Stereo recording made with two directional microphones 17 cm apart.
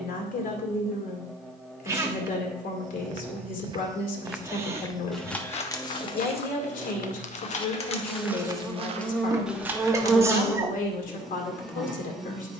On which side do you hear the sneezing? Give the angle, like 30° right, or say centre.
20° right.